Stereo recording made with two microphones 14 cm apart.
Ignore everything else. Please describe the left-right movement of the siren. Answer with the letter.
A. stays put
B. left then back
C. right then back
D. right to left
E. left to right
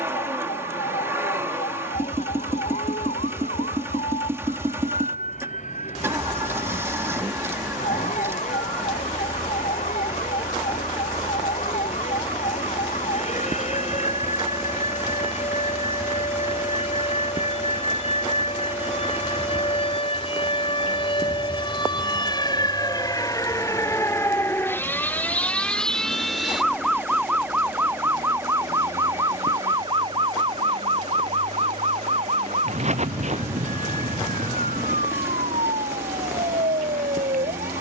E.